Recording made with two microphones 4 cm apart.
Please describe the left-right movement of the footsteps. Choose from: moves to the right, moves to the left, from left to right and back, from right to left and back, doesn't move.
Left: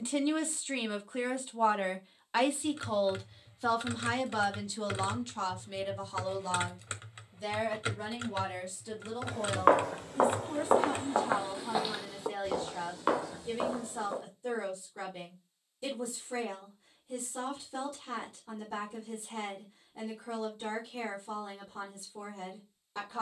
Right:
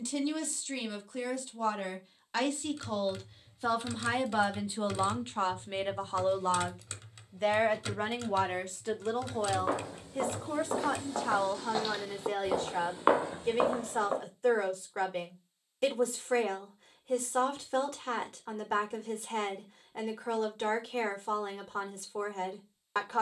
moves to the right.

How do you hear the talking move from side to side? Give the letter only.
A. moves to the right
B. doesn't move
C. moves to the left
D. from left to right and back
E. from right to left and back
A.